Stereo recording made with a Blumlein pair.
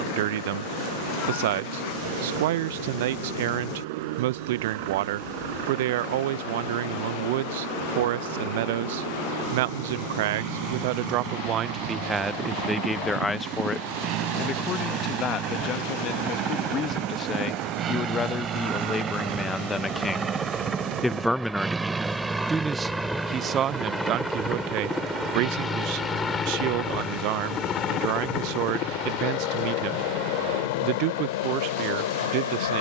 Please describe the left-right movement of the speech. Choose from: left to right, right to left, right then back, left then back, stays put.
left then back.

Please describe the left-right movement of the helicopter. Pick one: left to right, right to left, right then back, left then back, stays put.
right to left.